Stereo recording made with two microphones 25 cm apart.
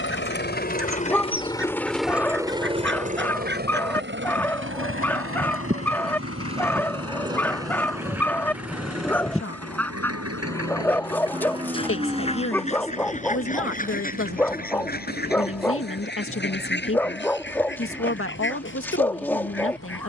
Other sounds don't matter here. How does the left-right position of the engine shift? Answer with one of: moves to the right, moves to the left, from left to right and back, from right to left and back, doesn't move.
moves to the right.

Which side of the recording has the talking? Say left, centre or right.
left.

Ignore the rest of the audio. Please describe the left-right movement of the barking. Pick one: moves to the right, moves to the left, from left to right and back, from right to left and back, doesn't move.
doesn't move.